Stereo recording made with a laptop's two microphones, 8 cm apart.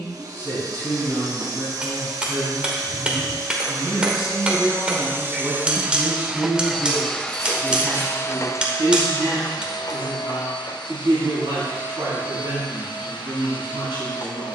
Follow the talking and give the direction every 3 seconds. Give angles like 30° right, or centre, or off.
20° left, centre, 20° right, 30° right, 30° right.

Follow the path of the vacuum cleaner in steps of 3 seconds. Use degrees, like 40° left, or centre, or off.
50° right, 30° right, 10° left, 60° left, 70° left.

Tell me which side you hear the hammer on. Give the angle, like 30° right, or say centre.
10° right.